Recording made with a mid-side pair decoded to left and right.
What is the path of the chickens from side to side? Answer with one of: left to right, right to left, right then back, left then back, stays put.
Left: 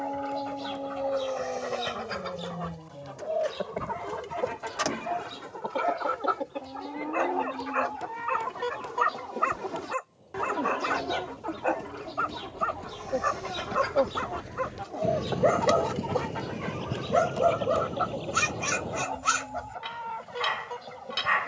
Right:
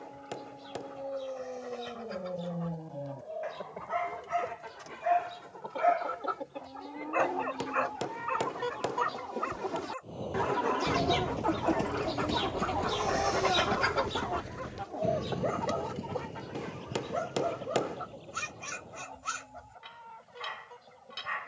right then back.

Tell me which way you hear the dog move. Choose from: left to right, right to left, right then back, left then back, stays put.
right then back.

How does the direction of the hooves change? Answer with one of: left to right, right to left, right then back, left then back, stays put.
right to left.